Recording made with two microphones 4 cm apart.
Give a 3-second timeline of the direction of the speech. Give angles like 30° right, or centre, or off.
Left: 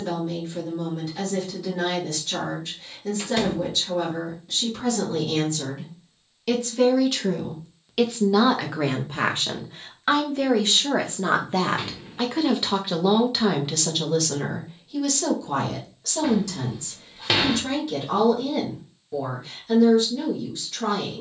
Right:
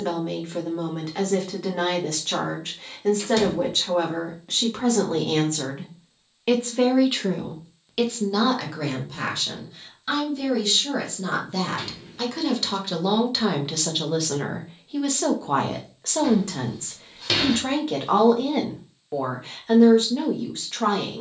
50° right, 50° right, 10° right, 40° left, centre, 40° right, 50° right.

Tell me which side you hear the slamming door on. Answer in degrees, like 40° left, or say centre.
20° left.